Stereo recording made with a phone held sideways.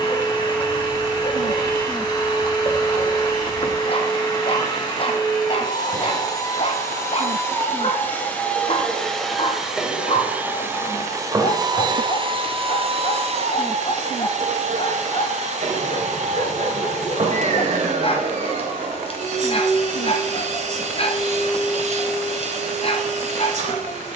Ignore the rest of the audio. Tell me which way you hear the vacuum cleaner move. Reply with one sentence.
In this clip you hear the vacuum cleaner move to the right.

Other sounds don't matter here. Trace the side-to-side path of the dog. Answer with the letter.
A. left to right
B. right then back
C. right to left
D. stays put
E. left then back
D.